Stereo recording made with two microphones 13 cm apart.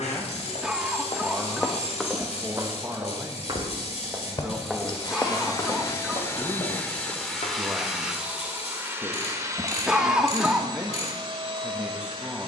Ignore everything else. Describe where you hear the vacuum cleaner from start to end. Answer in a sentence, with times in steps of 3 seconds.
You can hear the vacuum cleaner on the left from 0 s, in the centre from 6 s and on the right from 9 s.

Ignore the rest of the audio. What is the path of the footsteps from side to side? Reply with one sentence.
In this clip you hear the footsteps go right and come back.